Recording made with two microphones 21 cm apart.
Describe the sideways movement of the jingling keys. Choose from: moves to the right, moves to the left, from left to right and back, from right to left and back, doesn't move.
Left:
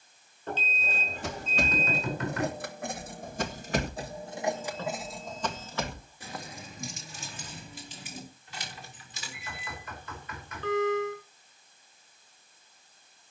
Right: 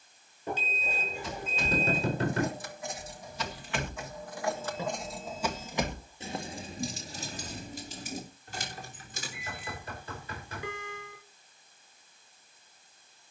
moves to the right.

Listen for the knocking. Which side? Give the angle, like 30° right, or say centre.
30° right.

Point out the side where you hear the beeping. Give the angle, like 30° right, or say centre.
10° right.